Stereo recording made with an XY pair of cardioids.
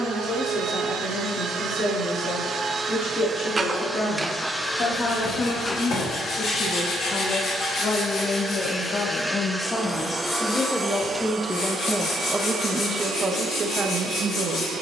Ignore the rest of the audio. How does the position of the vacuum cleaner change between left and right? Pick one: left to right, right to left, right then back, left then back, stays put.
left then back.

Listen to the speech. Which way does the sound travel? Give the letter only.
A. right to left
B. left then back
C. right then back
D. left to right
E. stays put
D.